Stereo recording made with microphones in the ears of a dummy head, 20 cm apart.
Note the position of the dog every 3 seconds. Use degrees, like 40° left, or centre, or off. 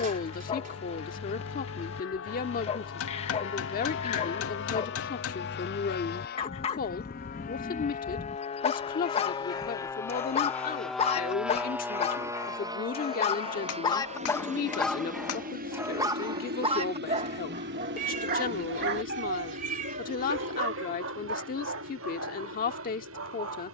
30° left, 30° left, 30° left, 30° left, 20° left, 20° right, 50° right, 60° right.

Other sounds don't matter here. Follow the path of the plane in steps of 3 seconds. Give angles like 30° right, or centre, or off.
70° left, 60° left, 40° left, 10° left, 20° right, 40° right, 50° right, 60° right.